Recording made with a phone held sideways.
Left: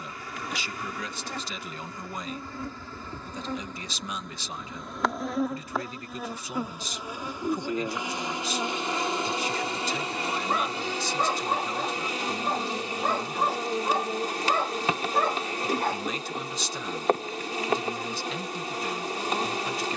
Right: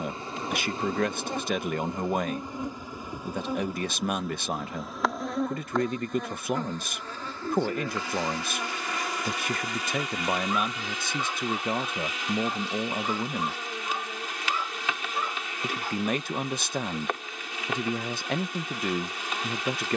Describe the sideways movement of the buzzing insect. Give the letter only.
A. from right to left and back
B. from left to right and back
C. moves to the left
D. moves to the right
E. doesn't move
C.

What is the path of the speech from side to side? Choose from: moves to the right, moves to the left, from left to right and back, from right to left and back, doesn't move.
doesn't move.